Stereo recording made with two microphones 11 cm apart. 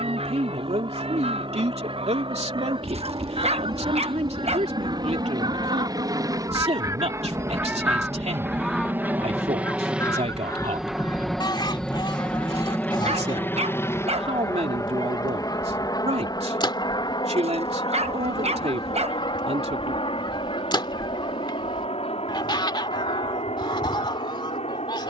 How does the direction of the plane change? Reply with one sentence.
In this clip you hear the plane move from right to left.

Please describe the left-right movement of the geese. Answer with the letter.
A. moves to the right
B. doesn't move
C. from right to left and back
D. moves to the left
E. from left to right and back
D.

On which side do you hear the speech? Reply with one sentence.
You can hear the speech on the right.